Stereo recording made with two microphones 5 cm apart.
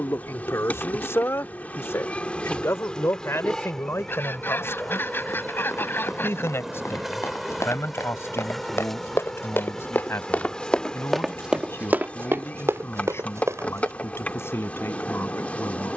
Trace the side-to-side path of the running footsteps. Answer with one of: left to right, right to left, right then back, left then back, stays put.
left to right.